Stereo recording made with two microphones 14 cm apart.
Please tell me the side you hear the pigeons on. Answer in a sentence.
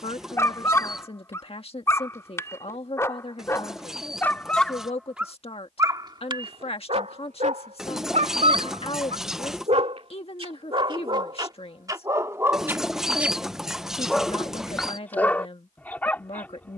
In this clip you hear the pigeons in the centre.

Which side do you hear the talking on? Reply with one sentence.
In this clip you hear the talking on the left.